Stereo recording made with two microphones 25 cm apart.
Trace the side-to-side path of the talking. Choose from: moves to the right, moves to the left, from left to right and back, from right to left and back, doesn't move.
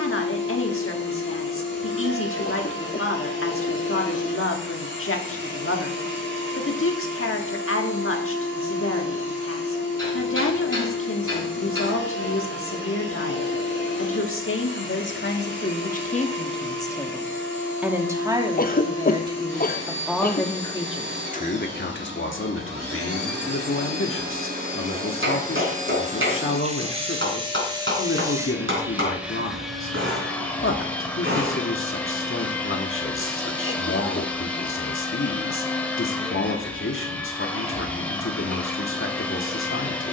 from left to right and back.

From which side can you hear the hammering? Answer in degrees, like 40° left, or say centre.
50° right.